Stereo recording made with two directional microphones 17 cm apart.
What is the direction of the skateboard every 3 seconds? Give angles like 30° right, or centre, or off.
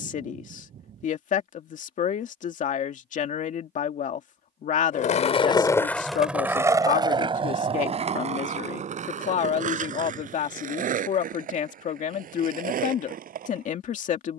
off, 30° left, 30° right, 50° right, 50° right.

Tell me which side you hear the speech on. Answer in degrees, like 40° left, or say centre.
50° left.